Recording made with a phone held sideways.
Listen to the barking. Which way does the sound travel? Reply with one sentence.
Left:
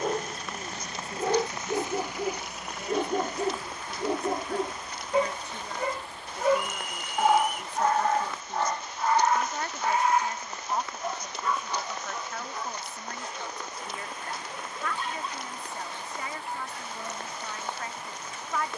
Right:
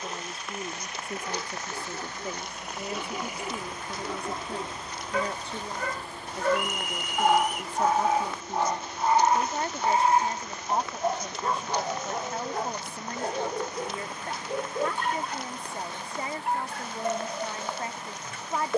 You can hear the barking travel towards the right.